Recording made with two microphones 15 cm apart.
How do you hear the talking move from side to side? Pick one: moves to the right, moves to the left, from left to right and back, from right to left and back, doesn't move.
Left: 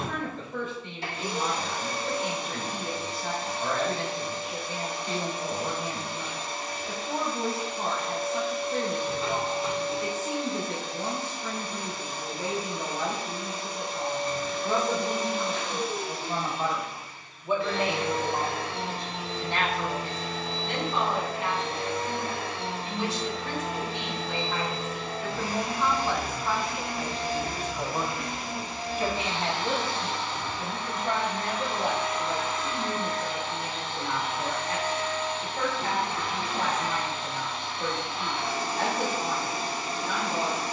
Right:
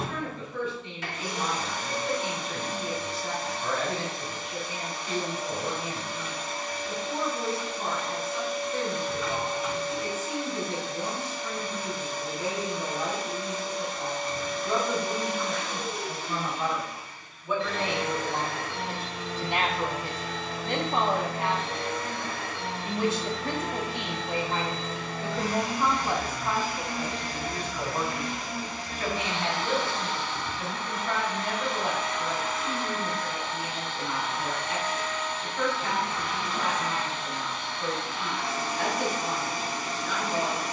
from left to right and back.